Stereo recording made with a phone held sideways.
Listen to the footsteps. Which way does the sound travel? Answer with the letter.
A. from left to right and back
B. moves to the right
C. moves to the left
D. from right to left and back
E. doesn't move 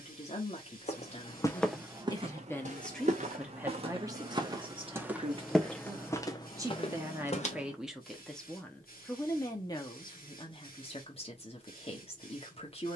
A.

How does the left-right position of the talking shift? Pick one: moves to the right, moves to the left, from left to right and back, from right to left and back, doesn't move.
from left to right and back.